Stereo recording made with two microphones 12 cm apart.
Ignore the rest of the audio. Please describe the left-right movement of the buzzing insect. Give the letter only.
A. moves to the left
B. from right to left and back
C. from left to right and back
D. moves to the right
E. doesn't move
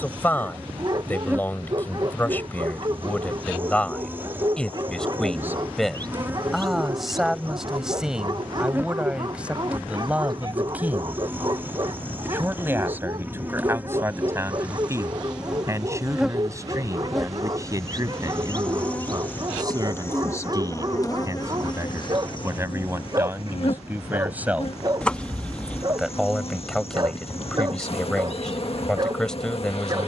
A.